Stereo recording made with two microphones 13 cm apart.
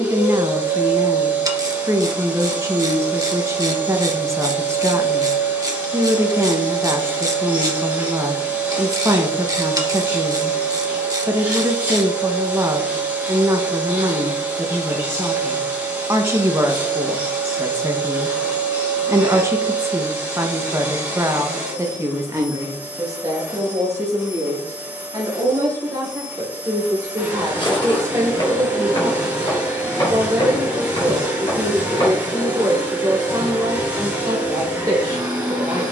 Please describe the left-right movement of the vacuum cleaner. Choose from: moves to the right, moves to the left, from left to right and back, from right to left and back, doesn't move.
doesn't move.